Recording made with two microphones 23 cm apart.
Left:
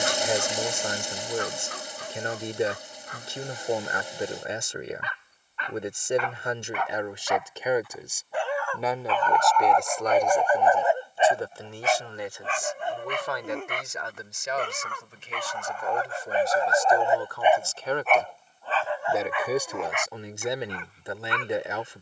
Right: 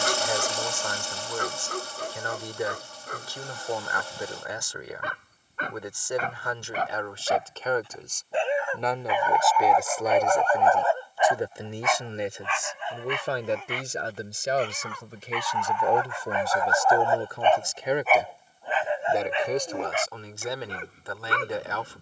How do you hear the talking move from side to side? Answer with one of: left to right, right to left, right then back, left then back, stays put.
right then back.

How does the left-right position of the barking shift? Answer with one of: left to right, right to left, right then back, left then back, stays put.
left then back.